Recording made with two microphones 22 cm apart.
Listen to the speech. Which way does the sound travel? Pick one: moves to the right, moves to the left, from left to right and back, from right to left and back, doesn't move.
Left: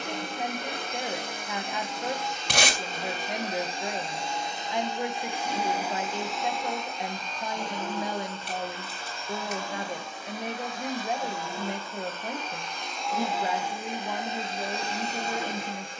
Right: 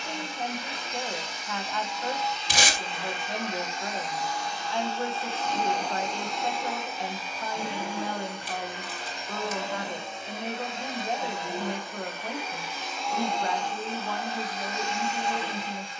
doesn't move.